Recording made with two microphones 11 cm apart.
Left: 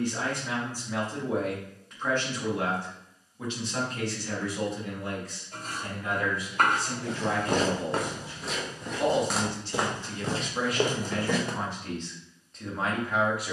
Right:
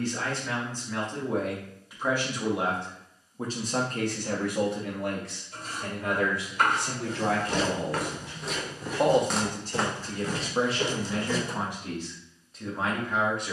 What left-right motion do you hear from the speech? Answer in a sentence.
In this clip you hear the speech move from left to right and back again.